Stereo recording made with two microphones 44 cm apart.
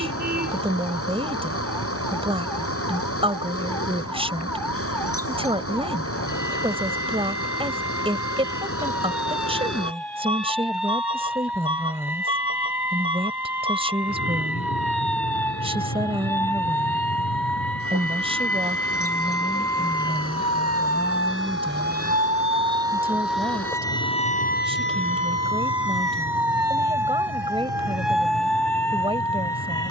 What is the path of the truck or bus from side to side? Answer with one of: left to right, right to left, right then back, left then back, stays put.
stays put.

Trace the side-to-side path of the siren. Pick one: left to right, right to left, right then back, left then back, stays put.
right to left.